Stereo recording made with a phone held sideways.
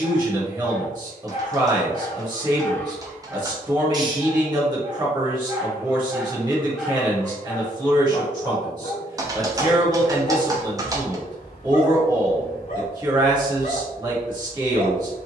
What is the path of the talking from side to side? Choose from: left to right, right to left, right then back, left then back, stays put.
stays put.